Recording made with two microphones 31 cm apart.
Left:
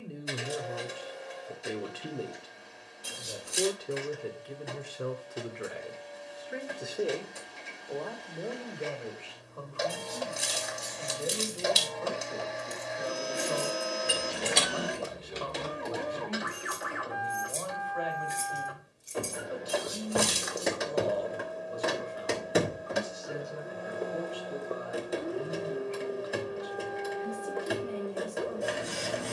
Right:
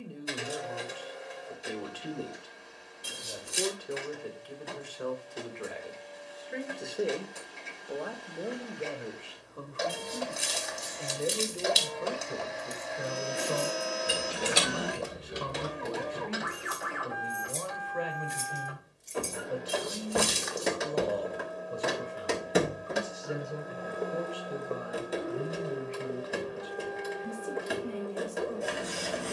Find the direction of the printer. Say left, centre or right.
centre.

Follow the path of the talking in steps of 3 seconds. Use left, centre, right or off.
left, left, centre, right, right, right, right, right, right, right.